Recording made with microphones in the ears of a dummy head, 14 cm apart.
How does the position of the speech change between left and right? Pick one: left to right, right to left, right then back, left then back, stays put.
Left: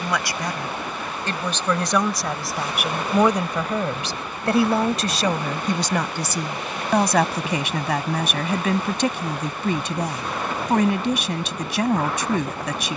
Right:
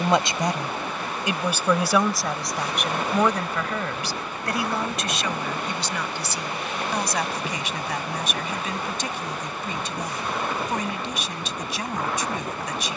right to left.